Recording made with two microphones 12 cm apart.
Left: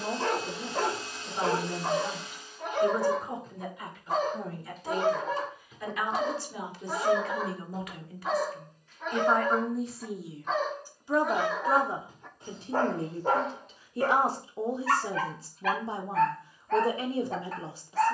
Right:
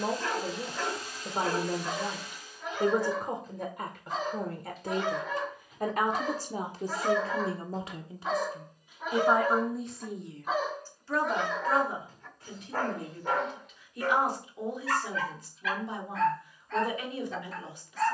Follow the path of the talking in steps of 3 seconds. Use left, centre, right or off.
right, right, right, centre, left, left.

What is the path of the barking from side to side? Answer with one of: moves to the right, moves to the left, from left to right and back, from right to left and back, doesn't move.
from left to right and back.